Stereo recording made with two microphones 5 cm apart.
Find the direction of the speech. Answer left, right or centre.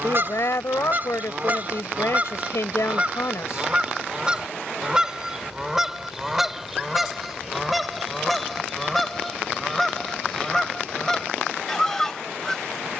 left.